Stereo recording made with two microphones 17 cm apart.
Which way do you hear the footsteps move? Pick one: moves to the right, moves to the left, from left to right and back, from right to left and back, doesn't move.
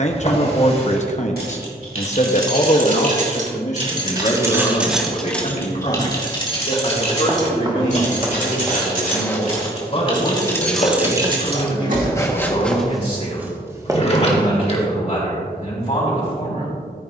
from right to left and back.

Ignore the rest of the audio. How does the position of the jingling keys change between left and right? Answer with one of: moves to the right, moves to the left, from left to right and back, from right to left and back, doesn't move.
from right to left and back.